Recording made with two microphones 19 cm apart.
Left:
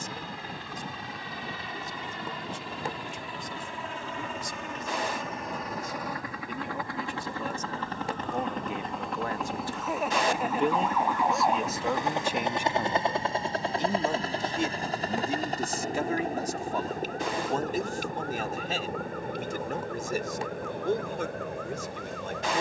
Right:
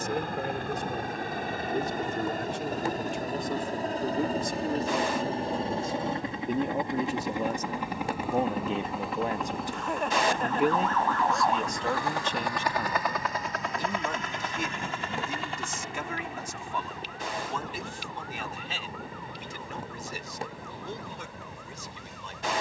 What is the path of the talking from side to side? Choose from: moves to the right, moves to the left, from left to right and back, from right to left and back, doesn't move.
moves to the left.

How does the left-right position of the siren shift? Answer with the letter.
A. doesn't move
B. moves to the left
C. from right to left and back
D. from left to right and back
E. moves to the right
B.